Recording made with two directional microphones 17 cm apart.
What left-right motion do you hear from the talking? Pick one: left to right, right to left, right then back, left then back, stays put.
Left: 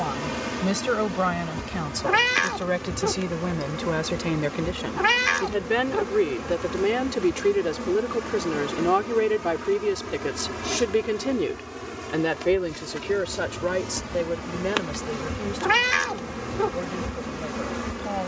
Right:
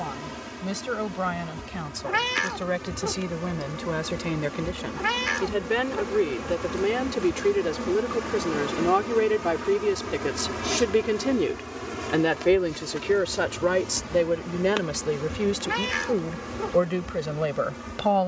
left to right.